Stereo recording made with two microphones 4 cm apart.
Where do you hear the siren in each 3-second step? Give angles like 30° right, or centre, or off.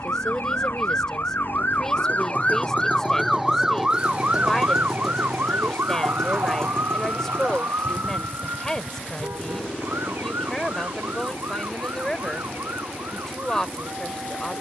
50° left, 30° right, 70° right, 80° right, 80° right.